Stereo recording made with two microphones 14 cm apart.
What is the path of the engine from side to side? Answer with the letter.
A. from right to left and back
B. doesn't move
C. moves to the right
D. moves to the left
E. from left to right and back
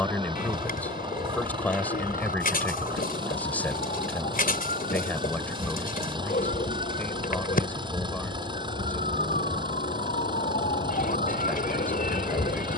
B.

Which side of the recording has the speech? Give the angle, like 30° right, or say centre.
10° left.